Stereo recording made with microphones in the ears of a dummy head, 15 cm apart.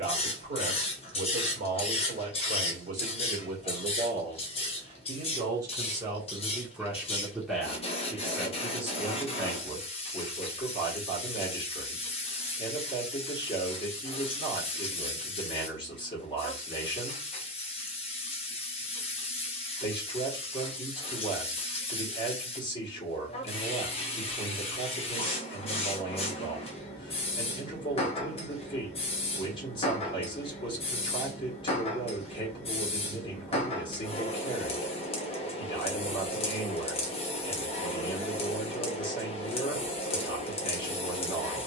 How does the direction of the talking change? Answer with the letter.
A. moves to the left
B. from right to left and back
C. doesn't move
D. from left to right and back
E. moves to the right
A.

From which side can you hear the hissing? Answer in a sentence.
In this clip you hear the hissing on the left.